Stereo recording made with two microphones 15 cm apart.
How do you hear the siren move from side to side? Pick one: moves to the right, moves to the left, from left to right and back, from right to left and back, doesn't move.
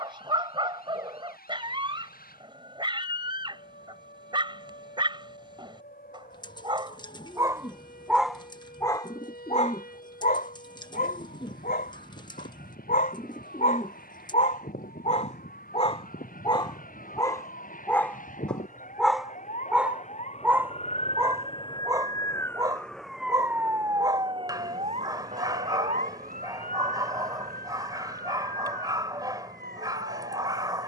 moves to the right.